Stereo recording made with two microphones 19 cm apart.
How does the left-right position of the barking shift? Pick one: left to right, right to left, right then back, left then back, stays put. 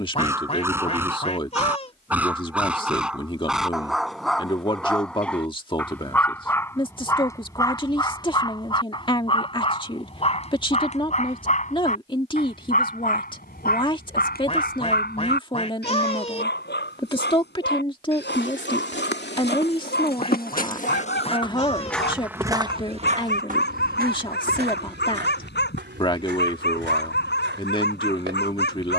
right to left.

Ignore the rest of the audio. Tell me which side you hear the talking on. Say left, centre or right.
left.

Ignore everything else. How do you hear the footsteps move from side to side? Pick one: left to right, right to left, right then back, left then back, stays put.
left to right.